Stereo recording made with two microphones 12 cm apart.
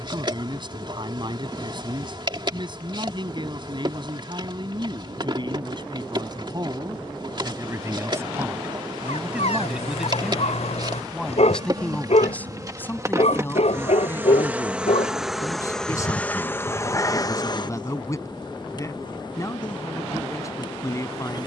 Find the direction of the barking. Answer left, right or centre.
left.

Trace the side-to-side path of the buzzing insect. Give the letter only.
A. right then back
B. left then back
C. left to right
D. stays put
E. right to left
E.